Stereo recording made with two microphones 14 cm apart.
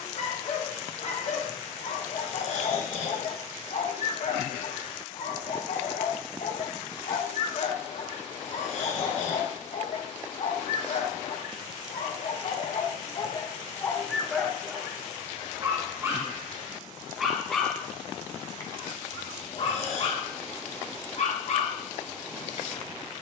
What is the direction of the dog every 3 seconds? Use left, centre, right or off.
left, left, left, left, left, centre, left, left.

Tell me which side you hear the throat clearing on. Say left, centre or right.
left.